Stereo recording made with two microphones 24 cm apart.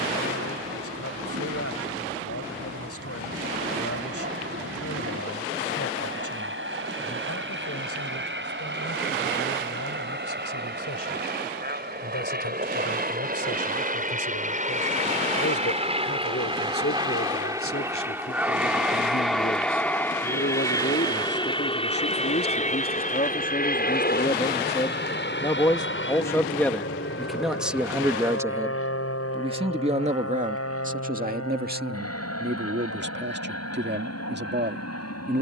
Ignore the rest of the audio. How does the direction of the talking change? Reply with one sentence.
In this clip you hear the talking move to the right.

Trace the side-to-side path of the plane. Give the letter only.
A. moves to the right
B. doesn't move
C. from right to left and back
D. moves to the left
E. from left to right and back
D.